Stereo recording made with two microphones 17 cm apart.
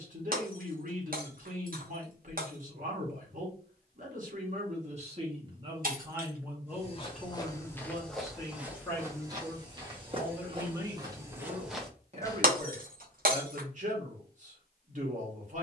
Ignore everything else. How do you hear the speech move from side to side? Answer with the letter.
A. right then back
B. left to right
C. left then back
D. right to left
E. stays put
C.